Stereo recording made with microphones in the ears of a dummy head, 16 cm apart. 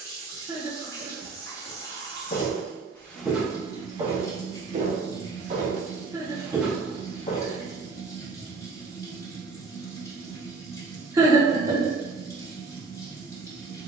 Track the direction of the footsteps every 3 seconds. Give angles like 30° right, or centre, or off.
30° left, 30° right, 10° left, off, off.